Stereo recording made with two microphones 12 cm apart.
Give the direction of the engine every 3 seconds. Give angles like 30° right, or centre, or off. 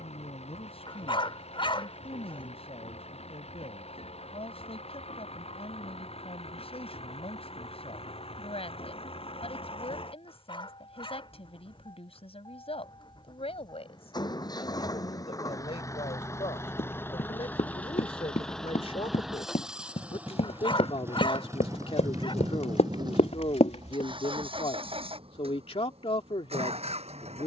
60° left, 60° left, 60° left, 50° left, 40° left, 20° left, centre, 30° right, 50° right.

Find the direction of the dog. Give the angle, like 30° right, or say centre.
50° left.